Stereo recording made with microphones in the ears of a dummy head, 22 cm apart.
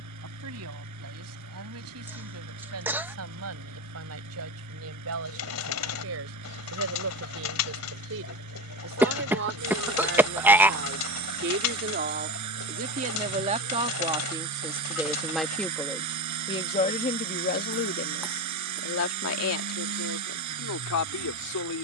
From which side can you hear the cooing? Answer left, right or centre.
left.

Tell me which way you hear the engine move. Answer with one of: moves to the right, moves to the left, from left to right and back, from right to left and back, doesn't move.
doesn't move.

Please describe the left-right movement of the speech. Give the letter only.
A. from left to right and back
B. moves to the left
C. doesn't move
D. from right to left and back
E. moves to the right
B.